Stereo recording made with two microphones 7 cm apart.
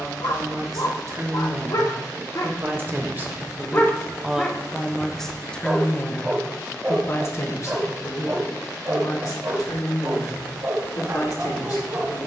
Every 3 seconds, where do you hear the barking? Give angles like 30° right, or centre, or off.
60° left, 10° left, 30° right, 50° right.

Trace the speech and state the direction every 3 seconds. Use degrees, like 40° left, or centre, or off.
40° right, 10° right, 40° left, 60° left.